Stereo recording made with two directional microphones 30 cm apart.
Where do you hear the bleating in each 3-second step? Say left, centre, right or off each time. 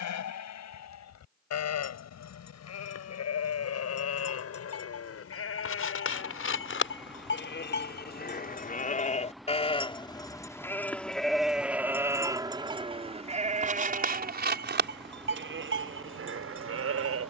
left, left, left, centre, right, right.